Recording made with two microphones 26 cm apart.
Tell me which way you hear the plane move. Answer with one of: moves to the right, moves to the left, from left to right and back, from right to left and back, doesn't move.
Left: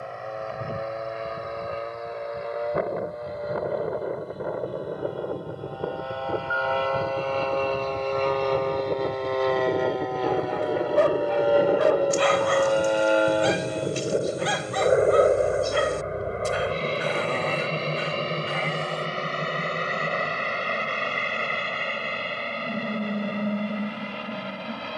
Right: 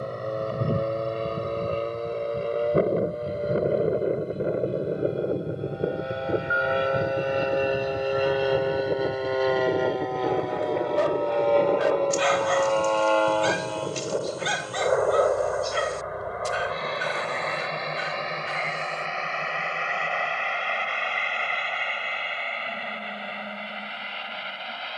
moves to the left.